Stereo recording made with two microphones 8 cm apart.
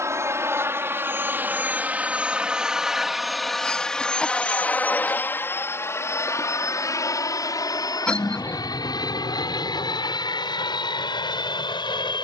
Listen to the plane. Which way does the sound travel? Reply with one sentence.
You can hear the plane go from the right side to the left.